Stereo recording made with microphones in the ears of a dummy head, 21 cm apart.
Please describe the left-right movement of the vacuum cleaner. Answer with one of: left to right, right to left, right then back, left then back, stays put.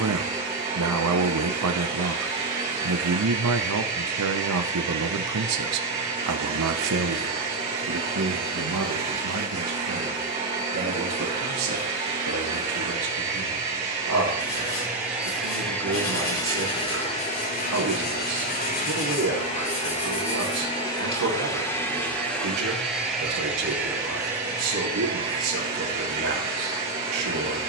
left then back.